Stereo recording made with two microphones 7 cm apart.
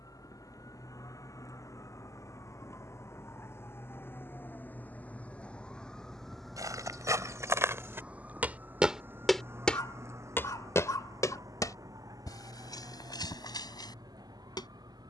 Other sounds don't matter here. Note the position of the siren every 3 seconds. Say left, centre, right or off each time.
left, left, centre, right, right.